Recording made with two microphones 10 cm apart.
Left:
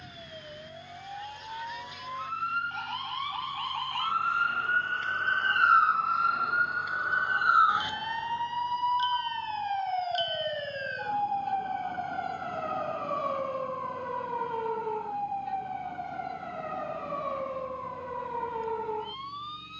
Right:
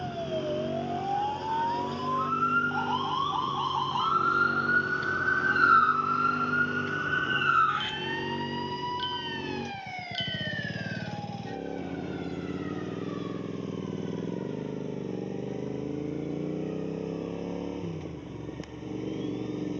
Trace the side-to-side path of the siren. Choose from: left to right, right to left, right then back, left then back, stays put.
right to left.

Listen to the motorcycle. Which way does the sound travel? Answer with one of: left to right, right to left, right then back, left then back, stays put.
stays put.